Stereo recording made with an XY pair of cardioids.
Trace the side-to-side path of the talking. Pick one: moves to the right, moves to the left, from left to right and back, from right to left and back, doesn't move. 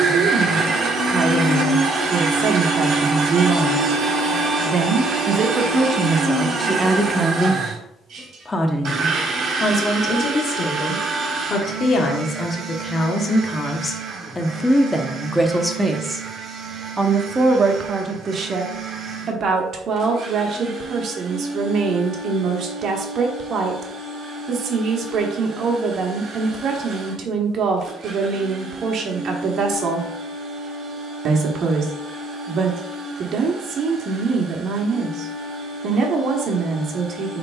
from right to left and back.